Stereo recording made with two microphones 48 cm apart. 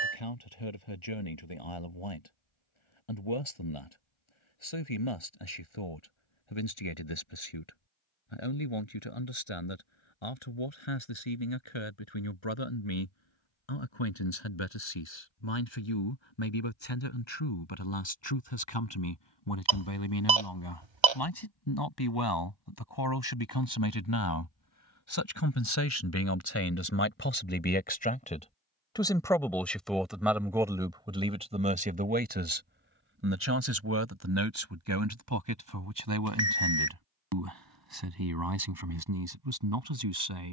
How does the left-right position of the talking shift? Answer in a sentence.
In this clip you hear the talking go from the left side to the right.